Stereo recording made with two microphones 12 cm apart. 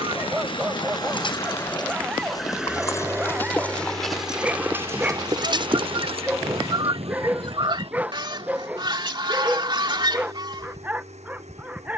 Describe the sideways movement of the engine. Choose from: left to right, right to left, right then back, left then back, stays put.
left to right.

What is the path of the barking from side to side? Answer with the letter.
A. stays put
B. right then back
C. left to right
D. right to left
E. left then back
A.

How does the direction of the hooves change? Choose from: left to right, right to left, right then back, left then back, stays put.
left to right.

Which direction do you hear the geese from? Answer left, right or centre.
right.